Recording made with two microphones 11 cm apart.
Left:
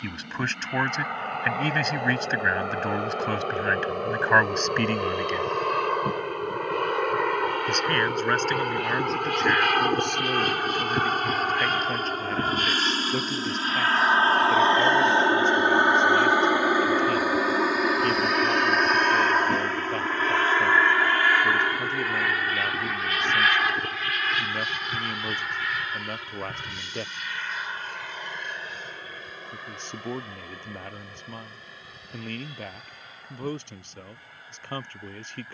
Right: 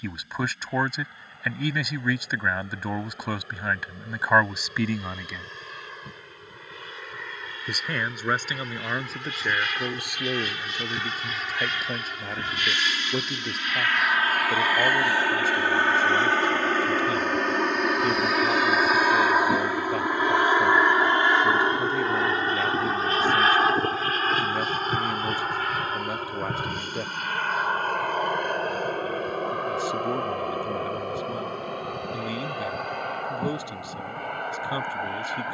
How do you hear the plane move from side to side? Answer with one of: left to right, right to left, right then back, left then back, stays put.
left to right.